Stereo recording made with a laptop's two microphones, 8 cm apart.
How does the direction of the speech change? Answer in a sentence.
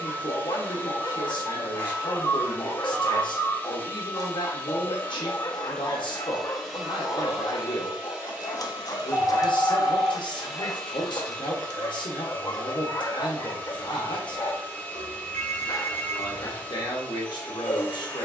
You can hear the speech stay in one place.